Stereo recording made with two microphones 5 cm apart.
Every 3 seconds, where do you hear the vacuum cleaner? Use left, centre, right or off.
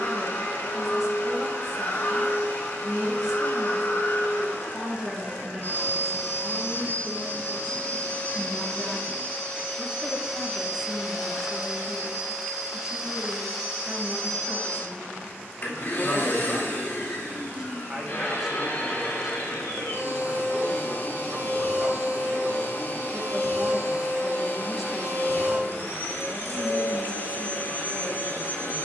left, left, left, centre, centre, left, left, left, left, left.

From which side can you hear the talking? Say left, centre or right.
centre.